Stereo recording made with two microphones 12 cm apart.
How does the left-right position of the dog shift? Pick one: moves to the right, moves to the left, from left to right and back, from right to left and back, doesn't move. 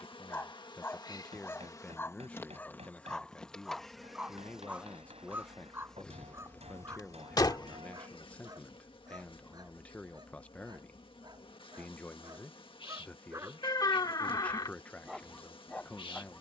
from left to right and back.